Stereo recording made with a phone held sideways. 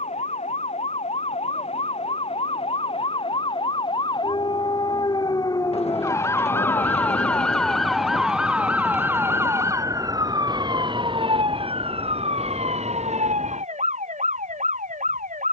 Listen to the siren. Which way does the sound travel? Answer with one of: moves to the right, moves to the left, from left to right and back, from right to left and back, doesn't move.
moves to the right.